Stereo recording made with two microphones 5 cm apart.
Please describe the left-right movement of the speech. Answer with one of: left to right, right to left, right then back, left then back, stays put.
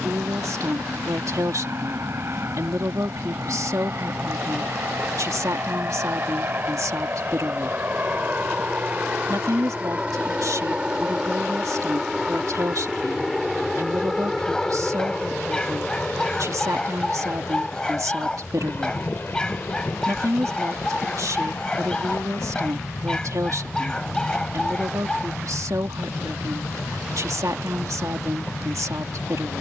stays put.